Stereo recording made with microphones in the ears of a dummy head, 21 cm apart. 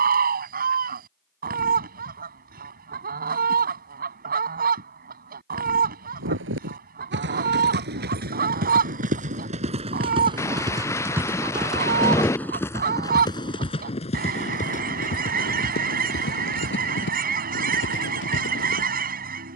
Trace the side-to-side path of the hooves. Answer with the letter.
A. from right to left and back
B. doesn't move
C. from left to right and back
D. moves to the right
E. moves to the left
E.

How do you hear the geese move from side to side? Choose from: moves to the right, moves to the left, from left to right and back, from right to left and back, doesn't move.
doesn't move.